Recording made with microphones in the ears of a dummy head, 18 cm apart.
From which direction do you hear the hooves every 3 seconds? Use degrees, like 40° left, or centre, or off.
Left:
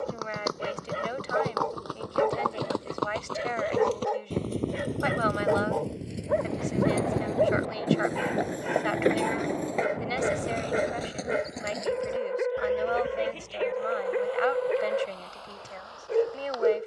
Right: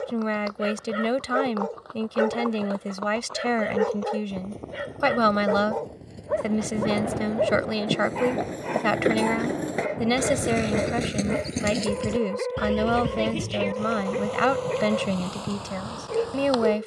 60° left, 50° left, 20° left, 30° right, 60° right, 70° right.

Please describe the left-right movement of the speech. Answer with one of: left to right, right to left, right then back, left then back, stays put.
stays put.